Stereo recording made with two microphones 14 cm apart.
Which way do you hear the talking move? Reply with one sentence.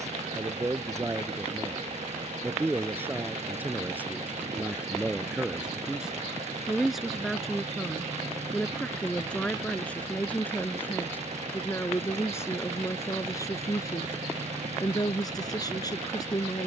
You can hear the talking move to the left.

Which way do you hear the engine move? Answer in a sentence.
You can hear the engine stay in one place.